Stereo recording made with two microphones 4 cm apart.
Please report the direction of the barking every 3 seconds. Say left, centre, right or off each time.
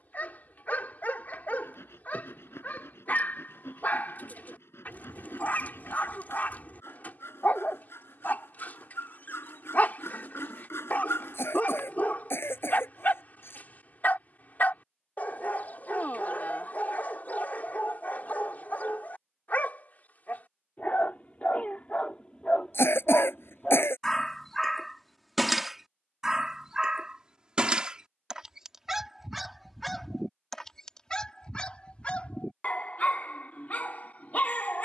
left, left, left, left, left, left, left, left, centre, centre, left, left.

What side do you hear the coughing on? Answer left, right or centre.
left.